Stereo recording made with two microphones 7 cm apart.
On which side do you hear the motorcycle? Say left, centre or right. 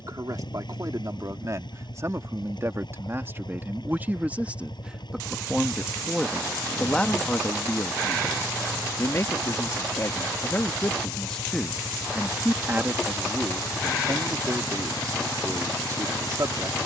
left.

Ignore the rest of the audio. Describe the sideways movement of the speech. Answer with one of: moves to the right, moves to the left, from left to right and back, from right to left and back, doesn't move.
from right to left and back.